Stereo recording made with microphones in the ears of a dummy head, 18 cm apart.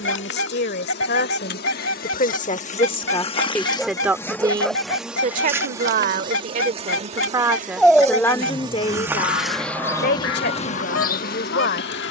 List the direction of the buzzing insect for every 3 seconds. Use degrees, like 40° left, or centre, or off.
50° left, 10° left, 30° right, 30° left.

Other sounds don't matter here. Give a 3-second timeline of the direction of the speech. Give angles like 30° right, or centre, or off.
50° left, 20° right, 10° right, 50° left.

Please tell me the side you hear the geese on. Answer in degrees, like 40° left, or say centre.
70° left.